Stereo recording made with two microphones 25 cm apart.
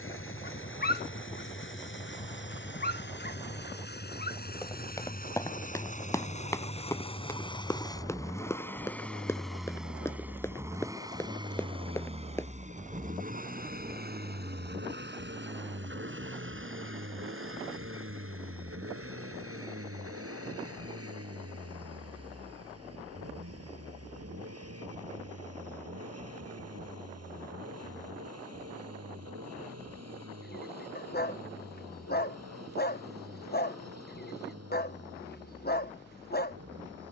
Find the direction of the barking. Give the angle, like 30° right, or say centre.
40° left.